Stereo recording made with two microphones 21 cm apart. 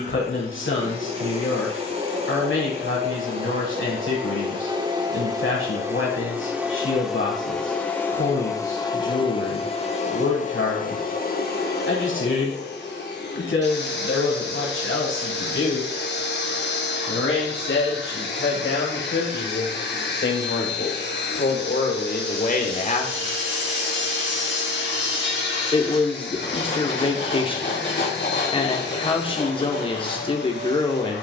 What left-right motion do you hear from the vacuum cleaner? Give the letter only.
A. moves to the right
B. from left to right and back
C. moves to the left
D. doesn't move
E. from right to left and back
C.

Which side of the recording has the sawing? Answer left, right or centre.
left.